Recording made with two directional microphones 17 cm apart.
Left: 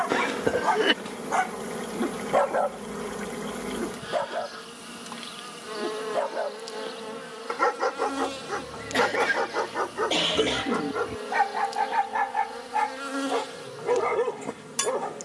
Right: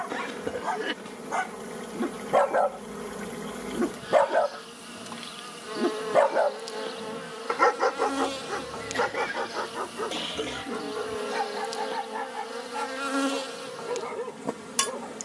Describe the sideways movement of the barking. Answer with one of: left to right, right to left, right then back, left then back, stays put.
right then back.